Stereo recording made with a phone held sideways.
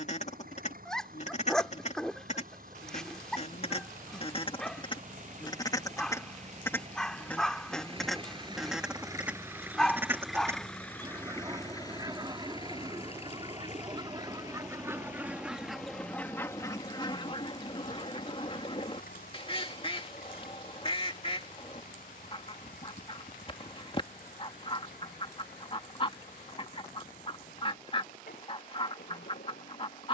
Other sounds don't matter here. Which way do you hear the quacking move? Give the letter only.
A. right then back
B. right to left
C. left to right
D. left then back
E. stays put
A.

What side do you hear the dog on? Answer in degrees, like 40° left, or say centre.
centre.